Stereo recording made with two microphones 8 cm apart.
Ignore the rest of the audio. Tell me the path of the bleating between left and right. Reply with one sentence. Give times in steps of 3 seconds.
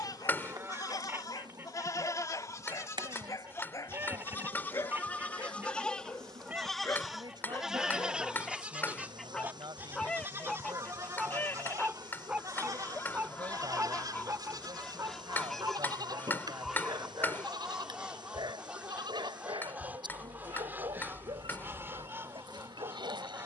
In this clip you hear the bleating on the left from 0 s, in the centre from 6 s and on the right from 9 s.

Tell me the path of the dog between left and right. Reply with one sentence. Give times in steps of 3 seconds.
You can hear the dog on the left from 0 s, in the centre from 9 s and on the right from 12 s.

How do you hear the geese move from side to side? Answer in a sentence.
In this clip you hear the geese move from right to left and back again.